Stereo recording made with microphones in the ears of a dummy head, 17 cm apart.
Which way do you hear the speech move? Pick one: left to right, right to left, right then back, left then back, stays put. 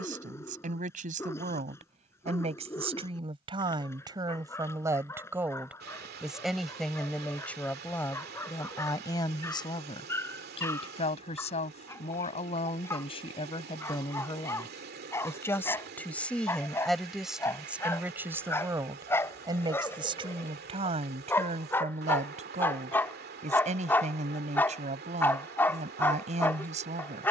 left then back.